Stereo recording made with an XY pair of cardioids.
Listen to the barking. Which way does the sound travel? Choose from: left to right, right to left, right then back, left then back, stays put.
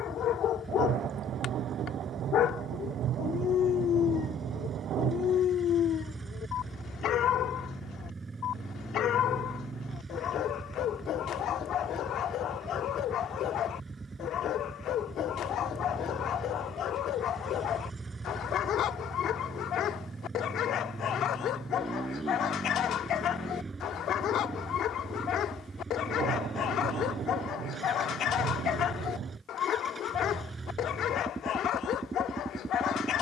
stays put.